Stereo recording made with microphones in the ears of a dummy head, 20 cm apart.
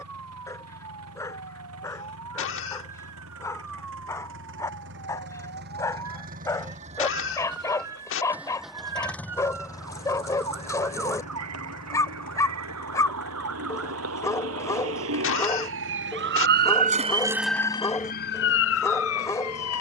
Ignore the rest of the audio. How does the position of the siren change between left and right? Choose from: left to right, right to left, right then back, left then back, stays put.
right to left.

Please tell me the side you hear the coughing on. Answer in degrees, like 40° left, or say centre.
60° left.